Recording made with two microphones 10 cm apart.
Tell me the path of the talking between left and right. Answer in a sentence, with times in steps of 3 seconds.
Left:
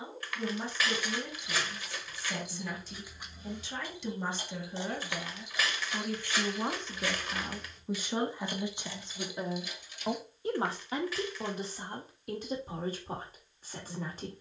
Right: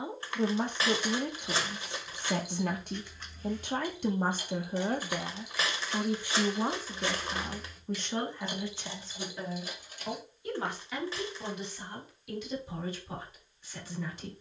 You can hear the talking on the right from 0 s, in the centre from 6 s and on the left from 9 s.